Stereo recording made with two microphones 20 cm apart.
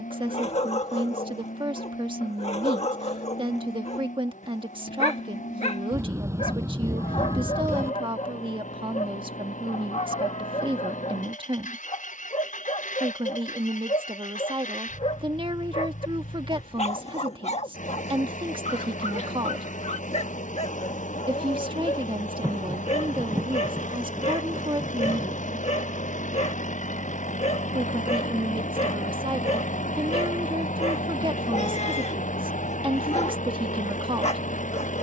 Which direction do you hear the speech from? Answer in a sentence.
You can hear the speech on the right.